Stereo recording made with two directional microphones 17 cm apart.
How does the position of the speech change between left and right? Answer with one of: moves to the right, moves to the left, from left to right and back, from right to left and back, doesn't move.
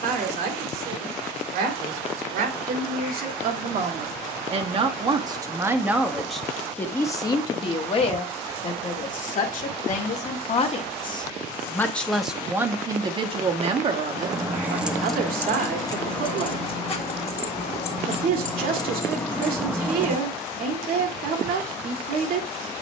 from right to left and back.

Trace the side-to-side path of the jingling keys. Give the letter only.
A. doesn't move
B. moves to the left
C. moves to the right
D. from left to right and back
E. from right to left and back
E.